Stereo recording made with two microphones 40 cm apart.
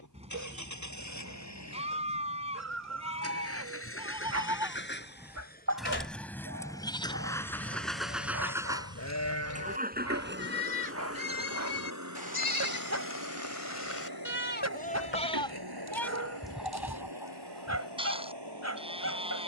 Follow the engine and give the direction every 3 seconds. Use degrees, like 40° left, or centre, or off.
40° left, 30° left, centre, 30° right, 60° right, 70° right, 80° right.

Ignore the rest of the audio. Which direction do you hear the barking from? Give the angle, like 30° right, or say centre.
40° right.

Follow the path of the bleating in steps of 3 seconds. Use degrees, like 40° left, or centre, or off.
20° right, 10° right, 20° left, 60° left, 40° left, centre, 10° right.